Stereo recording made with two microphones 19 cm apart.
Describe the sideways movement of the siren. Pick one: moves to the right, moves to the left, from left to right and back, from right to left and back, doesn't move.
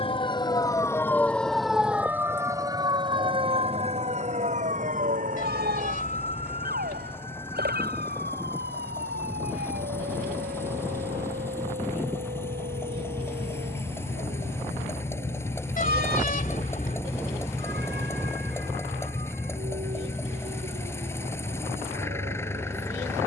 moves to the right.